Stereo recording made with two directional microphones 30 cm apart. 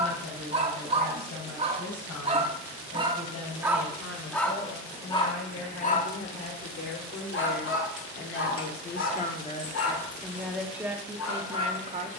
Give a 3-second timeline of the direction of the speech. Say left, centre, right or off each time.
left, left, left, centre.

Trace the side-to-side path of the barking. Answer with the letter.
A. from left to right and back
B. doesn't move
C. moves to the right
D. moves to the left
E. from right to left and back
D.